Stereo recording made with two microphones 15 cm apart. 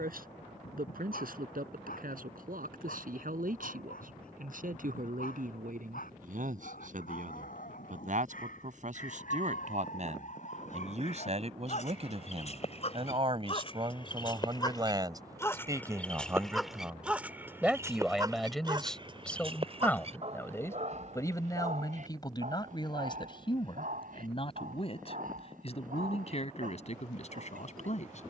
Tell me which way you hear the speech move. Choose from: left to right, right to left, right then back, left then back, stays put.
right to left.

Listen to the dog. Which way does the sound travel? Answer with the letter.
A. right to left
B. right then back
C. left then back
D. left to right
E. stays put
D.